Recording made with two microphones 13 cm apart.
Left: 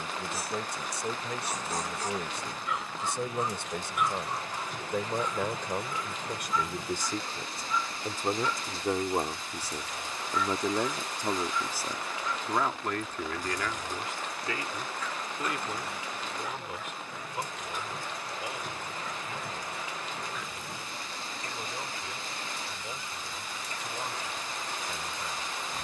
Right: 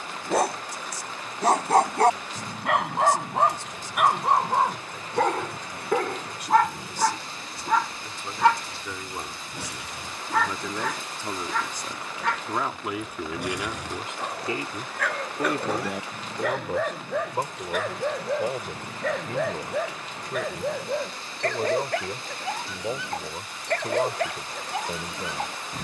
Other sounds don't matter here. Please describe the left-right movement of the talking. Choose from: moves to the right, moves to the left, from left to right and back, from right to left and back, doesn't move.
moves to the right.